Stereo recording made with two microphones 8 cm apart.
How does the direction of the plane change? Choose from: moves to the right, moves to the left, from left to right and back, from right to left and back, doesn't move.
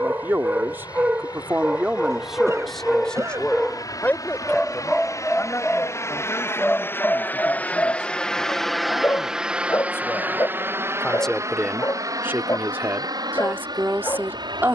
moves to the right.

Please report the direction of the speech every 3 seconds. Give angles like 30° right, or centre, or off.
20° right, 20° left, 40° left, 20° left, 30° right.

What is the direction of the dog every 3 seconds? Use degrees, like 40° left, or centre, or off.
10° right, 10° left, 20° left, 40° left, 40° left.